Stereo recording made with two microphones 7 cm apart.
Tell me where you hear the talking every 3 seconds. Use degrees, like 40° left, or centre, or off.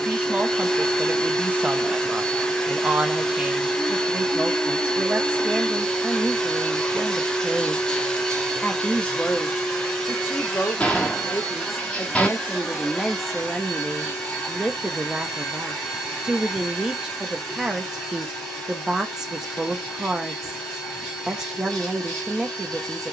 20° right, 20° right, 10° right, 30° left, centre, 10° right, 10° right, 10° right.